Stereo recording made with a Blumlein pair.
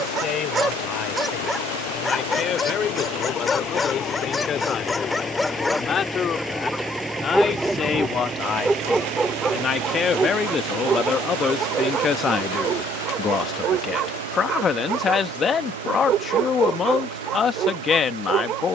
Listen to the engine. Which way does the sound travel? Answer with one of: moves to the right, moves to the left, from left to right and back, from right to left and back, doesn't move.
moves to the right.